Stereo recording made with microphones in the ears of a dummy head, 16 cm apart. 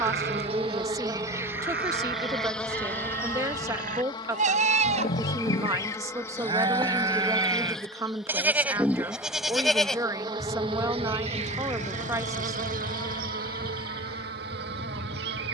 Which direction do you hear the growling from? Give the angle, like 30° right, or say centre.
50° left.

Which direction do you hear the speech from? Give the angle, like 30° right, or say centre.
20° right.